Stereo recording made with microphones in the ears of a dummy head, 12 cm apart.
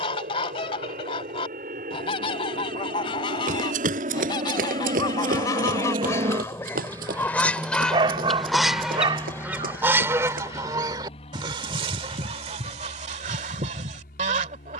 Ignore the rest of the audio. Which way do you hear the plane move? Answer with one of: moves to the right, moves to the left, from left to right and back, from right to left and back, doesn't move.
moves to the left.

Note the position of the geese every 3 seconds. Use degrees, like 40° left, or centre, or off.
40° left, 30° left, 10° left, 20° right, 50° right.